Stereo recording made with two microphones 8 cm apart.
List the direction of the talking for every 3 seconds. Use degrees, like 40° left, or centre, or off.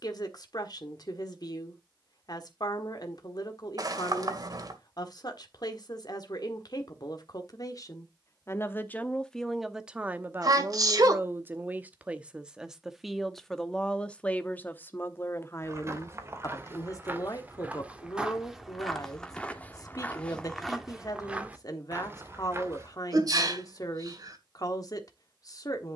50° left, 50° left, 50° left, 20° right, 10° left, 40° left, 50° left, 50° left, 50° left.